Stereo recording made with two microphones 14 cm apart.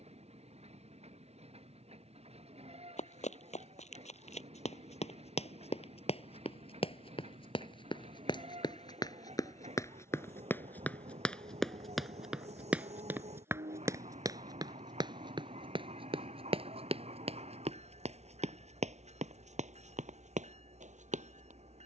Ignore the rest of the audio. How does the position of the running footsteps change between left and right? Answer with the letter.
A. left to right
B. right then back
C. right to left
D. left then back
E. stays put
A.